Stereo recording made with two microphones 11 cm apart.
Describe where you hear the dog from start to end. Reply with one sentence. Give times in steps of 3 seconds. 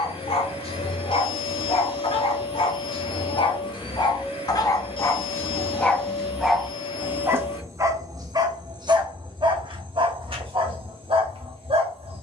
You can hear the dog on the left from 0 s and on the right from 6 s.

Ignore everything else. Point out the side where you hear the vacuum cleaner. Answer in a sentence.
In this clip you hear the vacuum cleaner on the left.